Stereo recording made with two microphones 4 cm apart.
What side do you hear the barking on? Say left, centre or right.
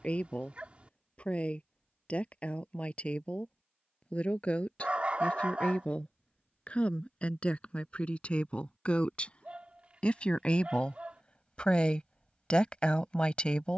right.